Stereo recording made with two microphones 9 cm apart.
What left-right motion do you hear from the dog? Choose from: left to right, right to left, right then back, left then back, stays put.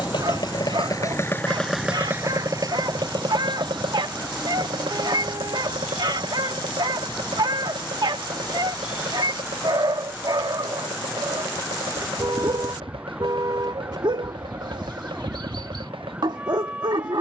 stays put.